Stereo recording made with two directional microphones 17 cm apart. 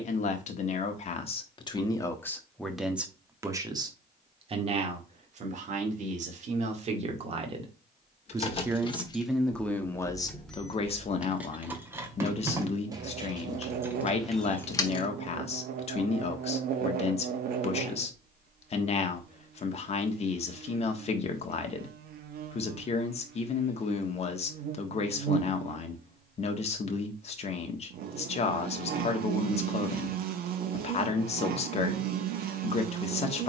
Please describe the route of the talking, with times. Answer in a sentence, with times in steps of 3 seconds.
You can hear the talking on the left from 0 s, on the right from 3 s and on the left from 9 s.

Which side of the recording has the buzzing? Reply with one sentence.
In this clip you hear the buzzing on the right.